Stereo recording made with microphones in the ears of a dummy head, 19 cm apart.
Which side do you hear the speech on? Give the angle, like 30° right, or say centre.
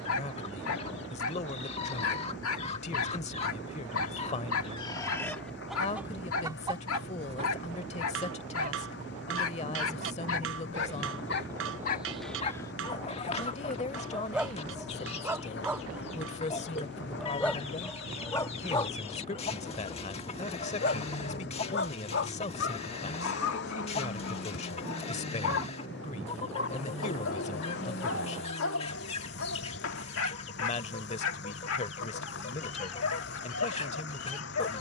30° left.